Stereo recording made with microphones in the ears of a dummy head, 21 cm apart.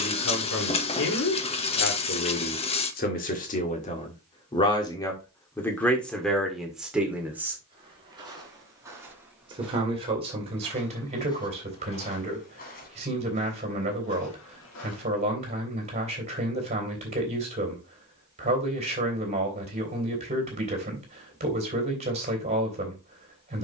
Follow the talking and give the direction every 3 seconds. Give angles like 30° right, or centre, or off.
60° left, 20° left, centre, 30° right, 30° right, 30° right, 30° right, 30° right.